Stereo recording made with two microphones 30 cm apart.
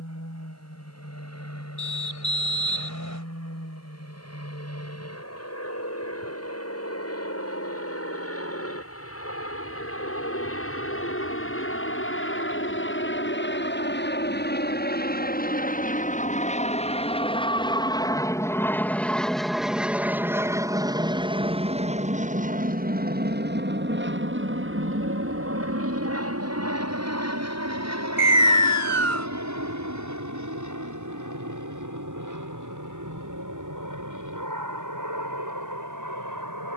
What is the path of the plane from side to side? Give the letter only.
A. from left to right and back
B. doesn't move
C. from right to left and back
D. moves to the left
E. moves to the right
E.